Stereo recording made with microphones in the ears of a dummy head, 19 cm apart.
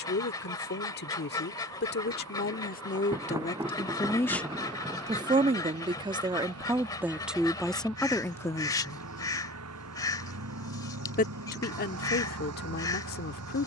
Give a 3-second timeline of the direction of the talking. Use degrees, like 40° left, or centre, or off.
50° left, centre, centre, 40° left, 50° left.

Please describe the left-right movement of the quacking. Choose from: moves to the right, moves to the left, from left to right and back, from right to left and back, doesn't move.
doesn't move.